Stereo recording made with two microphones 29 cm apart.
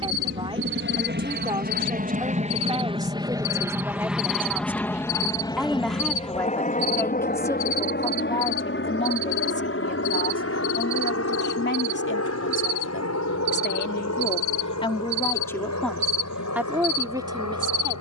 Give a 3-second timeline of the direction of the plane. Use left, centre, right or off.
right, centre, left, left, left, left.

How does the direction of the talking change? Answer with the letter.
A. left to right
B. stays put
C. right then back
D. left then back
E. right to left
D.